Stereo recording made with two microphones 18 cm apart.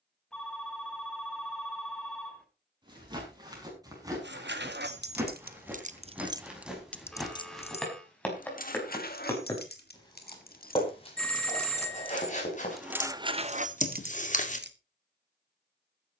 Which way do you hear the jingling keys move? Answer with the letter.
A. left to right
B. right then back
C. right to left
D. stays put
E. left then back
E.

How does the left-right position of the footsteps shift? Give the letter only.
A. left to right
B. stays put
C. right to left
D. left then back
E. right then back
C.